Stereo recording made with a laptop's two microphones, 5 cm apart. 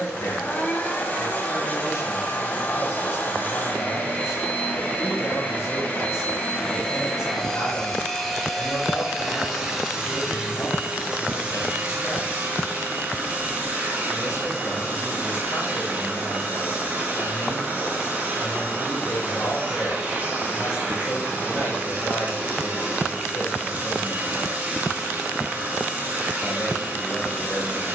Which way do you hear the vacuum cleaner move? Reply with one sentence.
In this clip you hear the vacuum cleaner go from the left side to the right.